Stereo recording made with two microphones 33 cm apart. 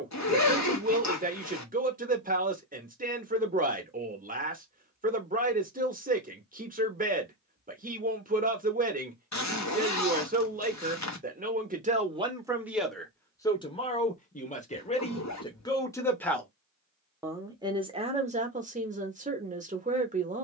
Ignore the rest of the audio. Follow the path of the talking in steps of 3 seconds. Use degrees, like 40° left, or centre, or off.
20° right, 20° right, 20° right, 20° right, 10° left, centre, 20° right.